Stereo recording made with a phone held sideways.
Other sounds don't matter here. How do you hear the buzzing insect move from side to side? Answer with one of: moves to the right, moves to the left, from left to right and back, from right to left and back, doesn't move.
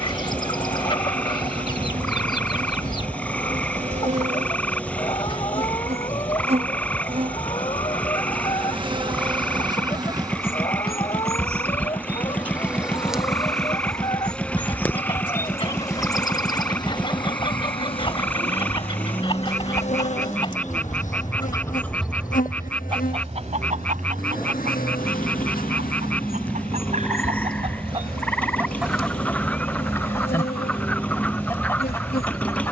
moves to the left.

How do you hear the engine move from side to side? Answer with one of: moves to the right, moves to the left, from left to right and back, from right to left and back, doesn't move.
doesn't move.